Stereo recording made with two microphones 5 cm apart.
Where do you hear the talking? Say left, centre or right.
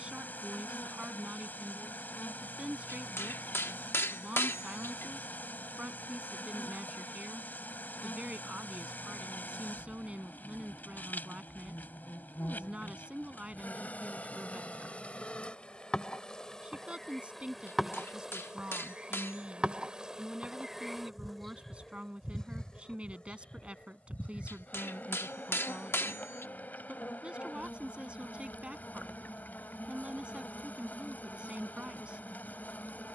right.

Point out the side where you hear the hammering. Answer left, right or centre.
left.